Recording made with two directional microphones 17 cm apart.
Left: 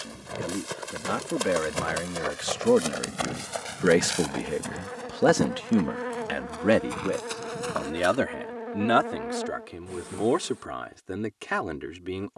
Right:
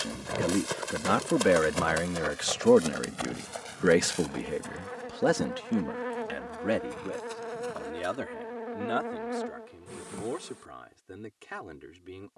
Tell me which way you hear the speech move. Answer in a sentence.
You can hear the speech move from right to left.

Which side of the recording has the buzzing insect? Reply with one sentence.
In this clip you hear the buzzing insect in the centre.